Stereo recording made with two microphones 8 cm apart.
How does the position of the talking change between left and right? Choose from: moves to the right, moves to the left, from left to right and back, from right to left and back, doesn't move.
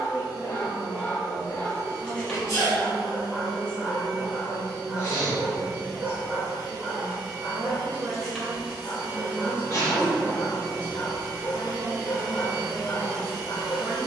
doesn't move.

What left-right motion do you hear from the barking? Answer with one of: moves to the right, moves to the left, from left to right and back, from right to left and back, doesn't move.
from left to right and back.